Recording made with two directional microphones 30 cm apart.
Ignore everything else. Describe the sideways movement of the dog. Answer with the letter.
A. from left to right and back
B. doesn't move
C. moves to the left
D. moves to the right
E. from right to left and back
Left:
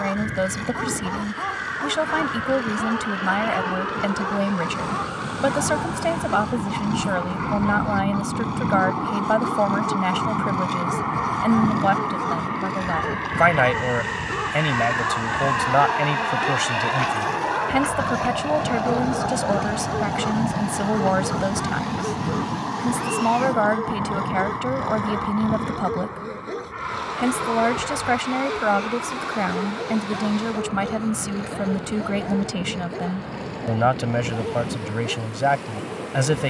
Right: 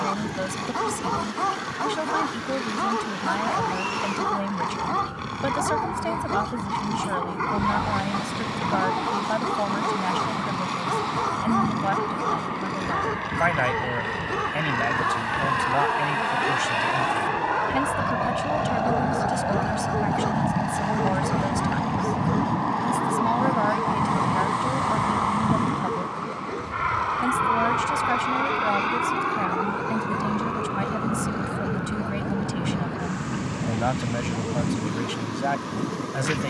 C.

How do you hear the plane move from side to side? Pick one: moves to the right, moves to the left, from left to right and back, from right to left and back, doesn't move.
moves to the right.